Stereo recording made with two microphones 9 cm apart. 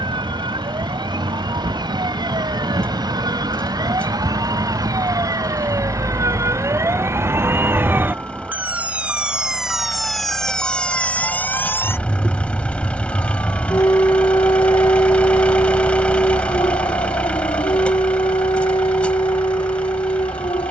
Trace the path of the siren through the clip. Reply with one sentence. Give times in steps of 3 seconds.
You can hear the siren on the right from 0 s, in the centre from 9 s and on the left from 12 s.